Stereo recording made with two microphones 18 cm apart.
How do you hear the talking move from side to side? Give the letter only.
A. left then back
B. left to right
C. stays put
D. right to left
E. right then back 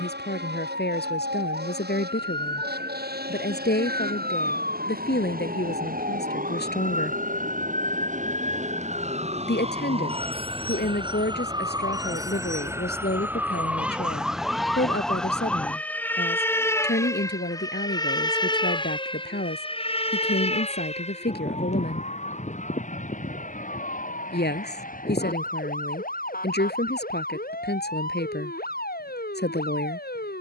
C.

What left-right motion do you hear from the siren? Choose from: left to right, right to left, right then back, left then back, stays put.
right to left.